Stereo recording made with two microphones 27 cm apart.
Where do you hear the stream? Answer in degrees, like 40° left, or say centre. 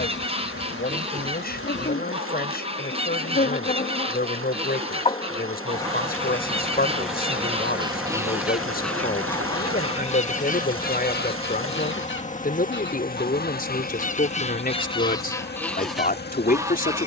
60° right.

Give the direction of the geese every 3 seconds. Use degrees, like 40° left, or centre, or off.
20° right, 20° right, 20° right, 30° left, 30° left, centre.